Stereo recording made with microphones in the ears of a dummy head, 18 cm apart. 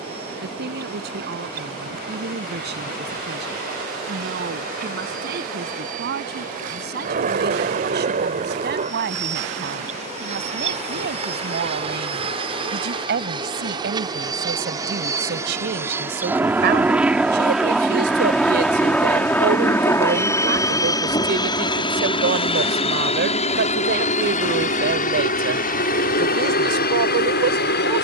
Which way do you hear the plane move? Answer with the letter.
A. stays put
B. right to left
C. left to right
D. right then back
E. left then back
B.